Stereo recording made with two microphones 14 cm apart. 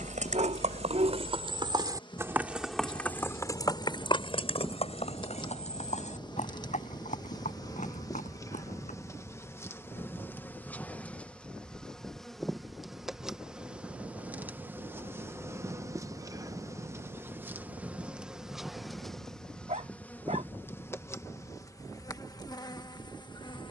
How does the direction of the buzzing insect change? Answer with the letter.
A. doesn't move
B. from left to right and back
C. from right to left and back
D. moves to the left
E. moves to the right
B.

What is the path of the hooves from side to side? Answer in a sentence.
You can hear the hooves travel towards the left.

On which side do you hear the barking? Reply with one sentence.
In this clip you hear the barking on the right.